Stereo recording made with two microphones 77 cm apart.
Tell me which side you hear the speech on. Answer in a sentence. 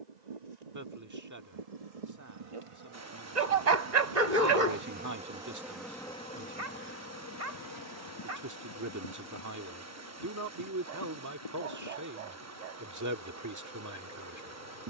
In this clip you hear the speech on the right.